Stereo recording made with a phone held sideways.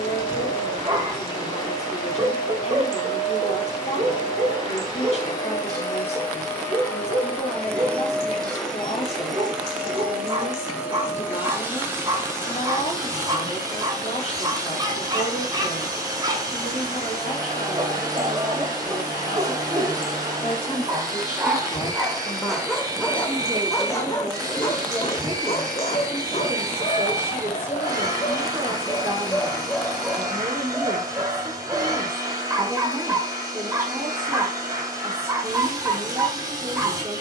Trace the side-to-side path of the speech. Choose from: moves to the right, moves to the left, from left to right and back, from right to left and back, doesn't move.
moves to the right.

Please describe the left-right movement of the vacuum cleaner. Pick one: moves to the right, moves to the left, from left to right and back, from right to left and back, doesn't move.
moves to the right.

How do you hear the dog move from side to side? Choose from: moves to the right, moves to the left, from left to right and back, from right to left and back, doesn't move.
from right to left and back.